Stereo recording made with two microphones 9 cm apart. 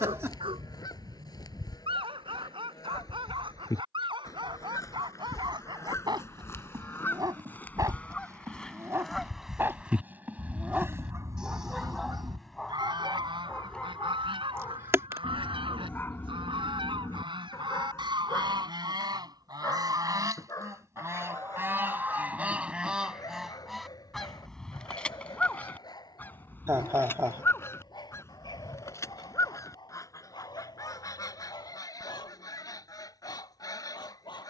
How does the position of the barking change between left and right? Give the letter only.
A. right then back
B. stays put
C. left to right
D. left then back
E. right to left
E.